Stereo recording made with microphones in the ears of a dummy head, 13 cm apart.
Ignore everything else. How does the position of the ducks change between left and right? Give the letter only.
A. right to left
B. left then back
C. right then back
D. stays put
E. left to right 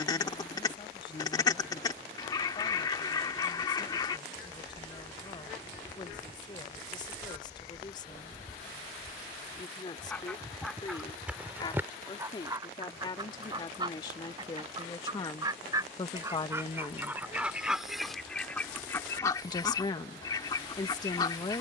C.